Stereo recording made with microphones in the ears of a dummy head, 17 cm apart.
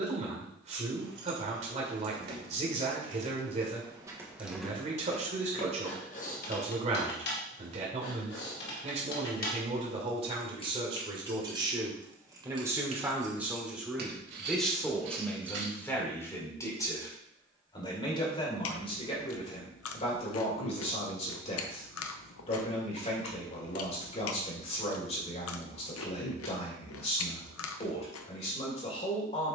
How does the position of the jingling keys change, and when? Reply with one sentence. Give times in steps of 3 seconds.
You can hear the jingling keys on the right from 0 s, in the centre from 3 s, on the left from 6 s, on the right from 12 s and not at all from 18 s.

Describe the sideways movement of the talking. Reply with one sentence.
In this clip you hear the talking move to the left.